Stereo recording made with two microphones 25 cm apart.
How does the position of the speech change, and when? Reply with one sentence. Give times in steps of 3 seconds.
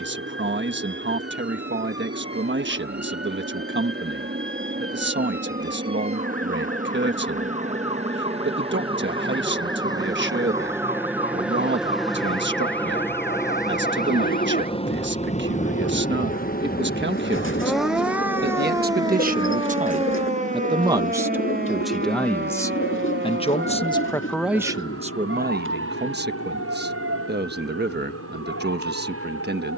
You can hear the speech on the right from 0 s, in the centre from 21 s and on the right from 24 s.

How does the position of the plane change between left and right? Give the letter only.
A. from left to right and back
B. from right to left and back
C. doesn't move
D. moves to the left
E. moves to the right
D.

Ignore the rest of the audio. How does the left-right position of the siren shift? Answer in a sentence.
You can hear the siren go from the left side to the right.